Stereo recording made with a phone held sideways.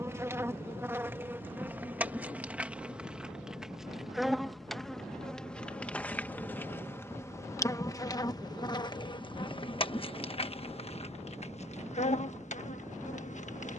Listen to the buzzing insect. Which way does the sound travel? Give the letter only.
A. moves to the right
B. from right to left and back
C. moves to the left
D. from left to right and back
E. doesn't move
C.